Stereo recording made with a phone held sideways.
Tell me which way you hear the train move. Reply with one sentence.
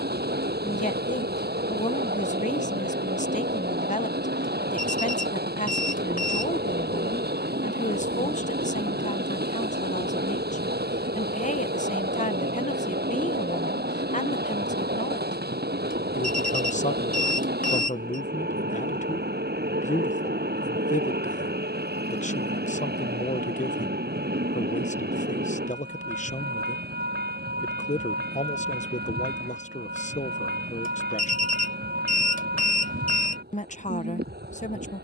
In this clip you hear the train stay in one place.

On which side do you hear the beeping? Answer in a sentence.
In this clip you hear the beeping on the left.